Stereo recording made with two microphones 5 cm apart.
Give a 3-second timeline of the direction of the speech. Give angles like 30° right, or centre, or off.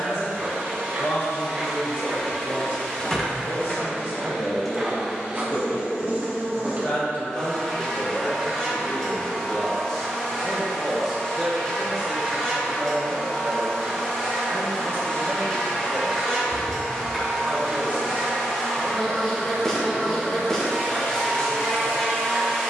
70° left, 60° left, 40° left, centre, 30° right, 40° right, 10° left, 60° left.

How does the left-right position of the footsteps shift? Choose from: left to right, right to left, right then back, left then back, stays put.
left then back.